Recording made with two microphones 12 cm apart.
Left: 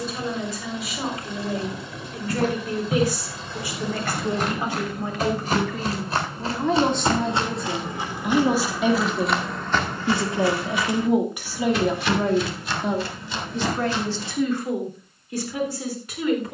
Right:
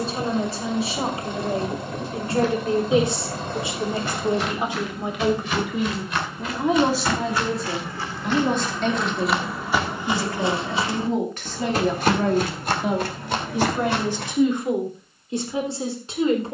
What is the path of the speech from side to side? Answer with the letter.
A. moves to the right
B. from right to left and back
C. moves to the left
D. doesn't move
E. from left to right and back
B.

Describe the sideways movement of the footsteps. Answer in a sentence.
You can hear the footsteps travel towards the right.